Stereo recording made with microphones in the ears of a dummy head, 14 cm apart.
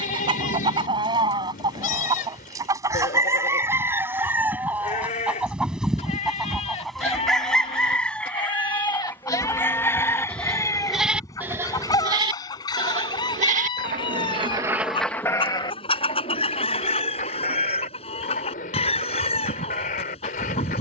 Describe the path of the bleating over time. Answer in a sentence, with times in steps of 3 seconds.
You can hear the bleating on the left from 0 s, in the centre from 9 s, on the right from 12 s and on the left from 15 s.